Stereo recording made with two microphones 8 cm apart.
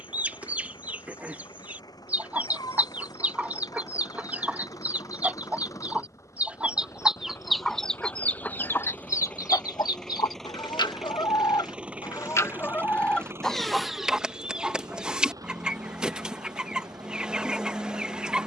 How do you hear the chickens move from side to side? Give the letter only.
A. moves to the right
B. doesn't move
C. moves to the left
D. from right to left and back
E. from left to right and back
D.